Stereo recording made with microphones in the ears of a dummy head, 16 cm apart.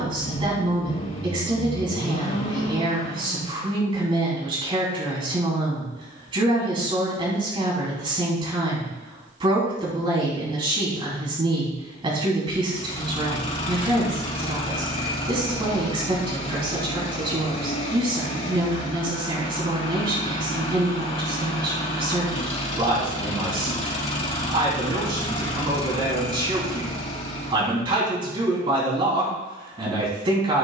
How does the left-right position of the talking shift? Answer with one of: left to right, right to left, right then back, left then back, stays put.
stays put.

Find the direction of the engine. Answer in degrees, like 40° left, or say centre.
40° left.